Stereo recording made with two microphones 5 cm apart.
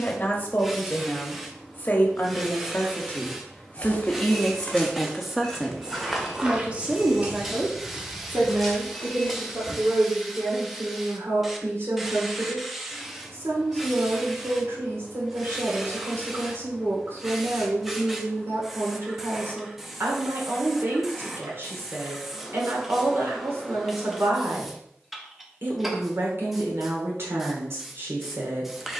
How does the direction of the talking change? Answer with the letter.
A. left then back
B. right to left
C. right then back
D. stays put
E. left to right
E.